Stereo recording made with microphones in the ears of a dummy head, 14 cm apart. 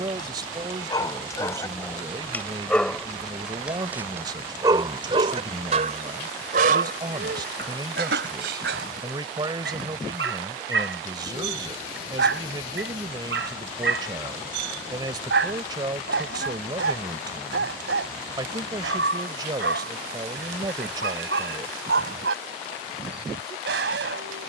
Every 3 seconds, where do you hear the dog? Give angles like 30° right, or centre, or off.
20° left, 30° right, 70° right, 80° right, 80° right, 80° right, 80° right, 80° right.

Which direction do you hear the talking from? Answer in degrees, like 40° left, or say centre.
30° right.